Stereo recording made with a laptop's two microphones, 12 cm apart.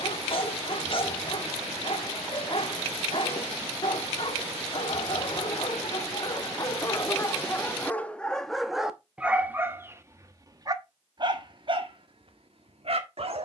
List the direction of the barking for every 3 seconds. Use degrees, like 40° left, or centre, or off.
50° left, 40° left, 20° left, 30° right, 60° right.